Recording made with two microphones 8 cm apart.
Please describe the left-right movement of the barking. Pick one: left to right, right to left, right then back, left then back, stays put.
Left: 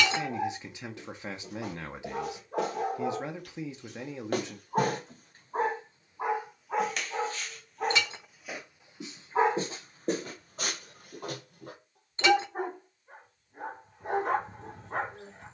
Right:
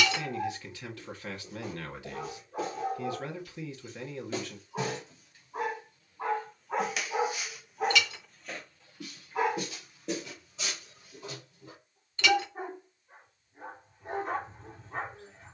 right then back.